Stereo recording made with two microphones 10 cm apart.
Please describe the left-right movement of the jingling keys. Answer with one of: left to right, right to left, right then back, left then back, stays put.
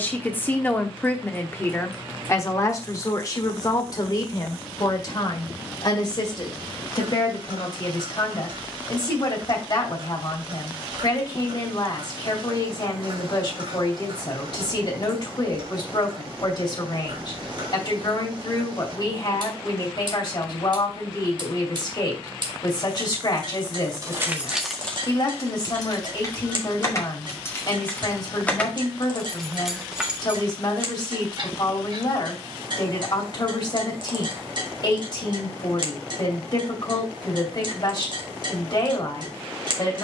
left then back.